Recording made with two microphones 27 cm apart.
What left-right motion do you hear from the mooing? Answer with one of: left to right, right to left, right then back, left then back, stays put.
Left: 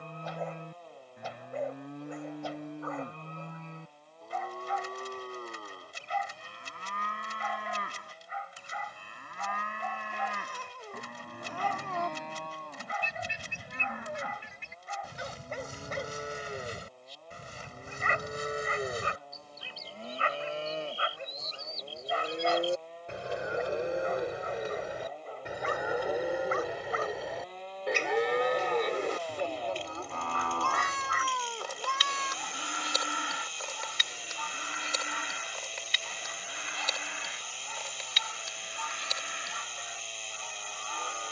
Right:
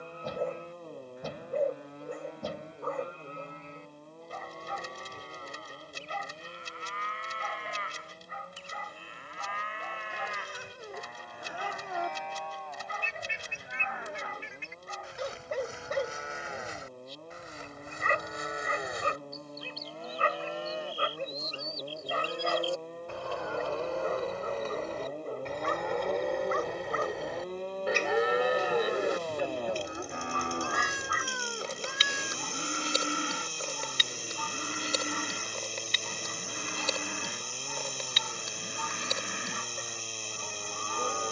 left to right.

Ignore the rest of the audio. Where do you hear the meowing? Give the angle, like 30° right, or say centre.
10° right.